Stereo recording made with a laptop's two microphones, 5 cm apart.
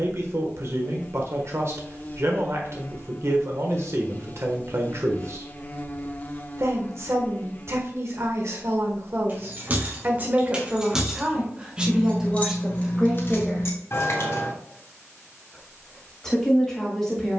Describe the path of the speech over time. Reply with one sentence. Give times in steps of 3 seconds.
In this clip you hear the speech on the right from 0 s and in the centre from 12 s.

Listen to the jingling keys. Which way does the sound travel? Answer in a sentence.
In this clip you hear the jingling keys move from right to left.